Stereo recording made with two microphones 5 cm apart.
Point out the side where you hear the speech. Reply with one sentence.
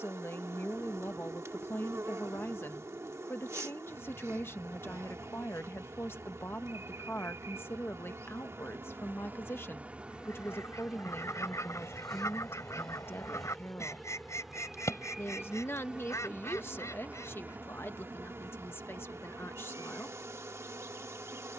In this clip you hear the speech on the left.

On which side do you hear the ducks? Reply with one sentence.
In this clip you hear the ducks on the left.